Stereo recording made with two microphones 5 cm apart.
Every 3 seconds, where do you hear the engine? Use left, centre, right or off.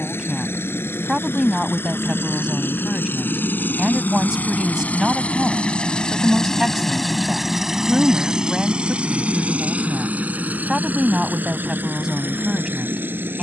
left, left, centre, right, right.